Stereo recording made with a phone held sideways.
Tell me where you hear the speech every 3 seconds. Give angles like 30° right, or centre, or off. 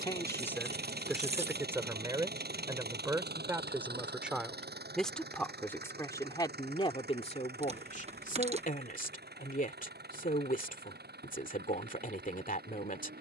centre, centre, 40° left, 60° left, 60° left.